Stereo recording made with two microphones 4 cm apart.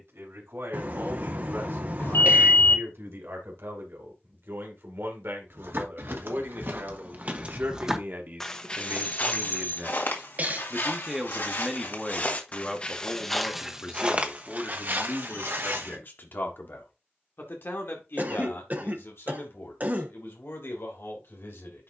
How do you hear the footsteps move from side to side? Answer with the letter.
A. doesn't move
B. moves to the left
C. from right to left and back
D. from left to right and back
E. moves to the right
C.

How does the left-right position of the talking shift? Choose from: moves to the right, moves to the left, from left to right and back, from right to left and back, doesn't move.
moves to the left.